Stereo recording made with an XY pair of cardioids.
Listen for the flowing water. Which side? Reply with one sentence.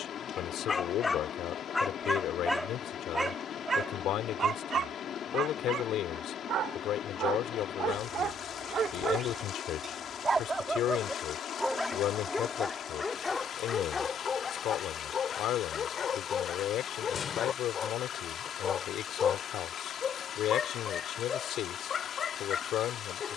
You can hear the flowing water on the left.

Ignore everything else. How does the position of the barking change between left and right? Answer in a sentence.
In this clip you hear the barking go right and come back.